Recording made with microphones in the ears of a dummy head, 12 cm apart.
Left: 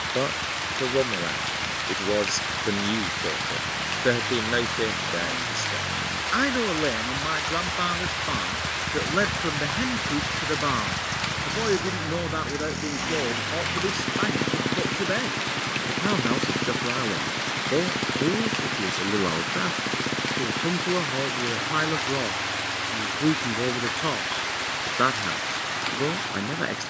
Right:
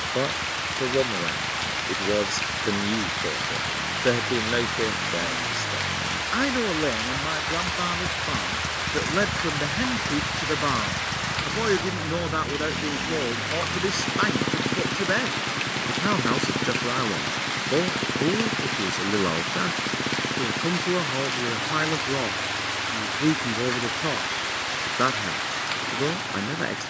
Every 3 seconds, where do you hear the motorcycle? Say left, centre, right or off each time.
right, right, right, centre, left, left, left, left, left.